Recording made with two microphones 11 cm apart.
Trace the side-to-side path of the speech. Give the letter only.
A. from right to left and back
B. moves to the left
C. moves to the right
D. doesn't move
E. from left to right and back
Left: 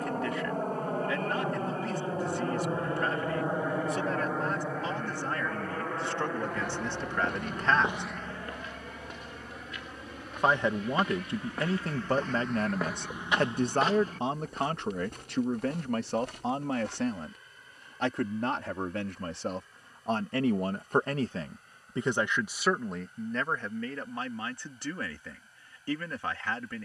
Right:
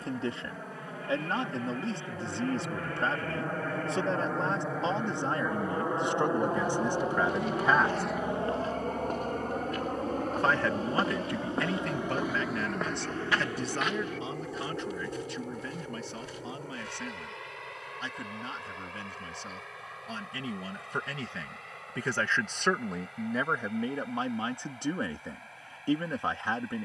A.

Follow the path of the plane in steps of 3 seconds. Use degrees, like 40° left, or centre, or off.
40° left, centre, 30° right, 50° right, 60° right, 70° right, 70° right, 80° right, 80° right.